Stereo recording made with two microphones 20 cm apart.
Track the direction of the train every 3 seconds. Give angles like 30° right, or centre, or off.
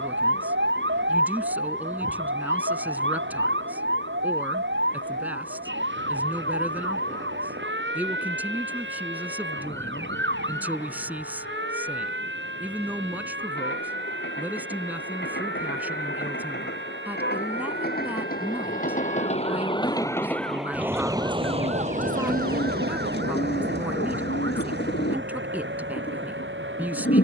80° left, 80° left, 80° left, 80° left, 70° left, 70° left, 30° left, 50° right, 70° right.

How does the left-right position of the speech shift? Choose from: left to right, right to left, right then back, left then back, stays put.
stays put.